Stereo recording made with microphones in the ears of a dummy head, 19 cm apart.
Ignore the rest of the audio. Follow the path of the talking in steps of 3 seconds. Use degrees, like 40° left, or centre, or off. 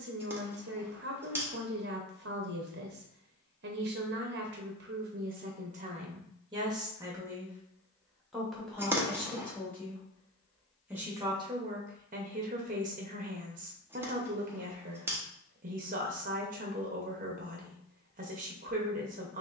50° right, 50° right, 10° right, 10° right, 40° right, 40° right, 40° right.